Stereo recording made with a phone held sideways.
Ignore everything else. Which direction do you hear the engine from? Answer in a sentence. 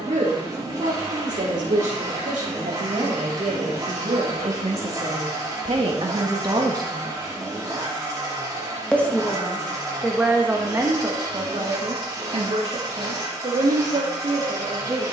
You can hear the engine on the right.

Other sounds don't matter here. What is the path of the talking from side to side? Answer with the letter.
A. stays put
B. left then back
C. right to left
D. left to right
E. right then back
B.